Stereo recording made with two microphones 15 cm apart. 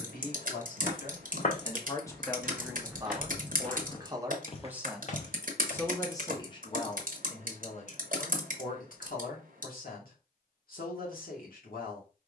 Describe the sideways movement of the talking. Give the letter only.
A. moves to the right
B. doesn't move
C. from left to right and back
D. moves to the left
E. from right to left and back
C.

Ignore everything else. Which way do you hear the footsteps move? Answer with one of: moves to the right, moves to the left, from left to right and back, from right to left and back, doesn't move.
from left to right and back.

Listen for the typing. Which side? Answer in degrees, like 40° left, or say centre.
60° right.